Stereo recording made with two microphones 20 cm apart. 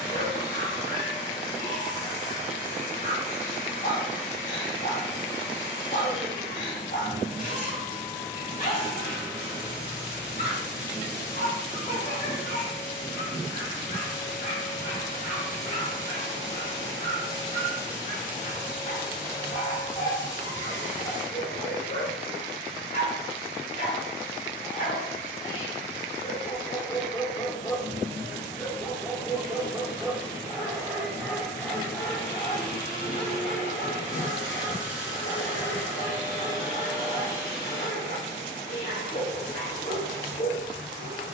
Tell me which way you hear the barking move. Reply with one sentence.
You can hear the barking move from left to right and back again.